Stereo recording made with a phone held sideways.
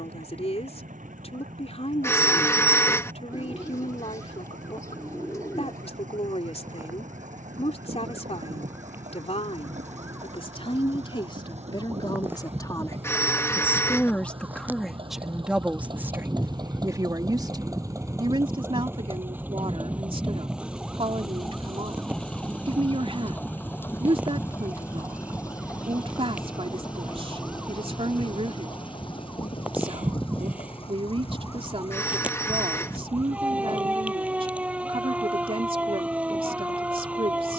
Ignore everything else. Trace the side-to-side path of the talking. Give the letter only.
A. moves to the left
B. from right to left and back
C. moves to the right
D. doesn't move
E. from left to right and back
C.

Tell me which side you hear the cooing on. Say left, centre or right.
left.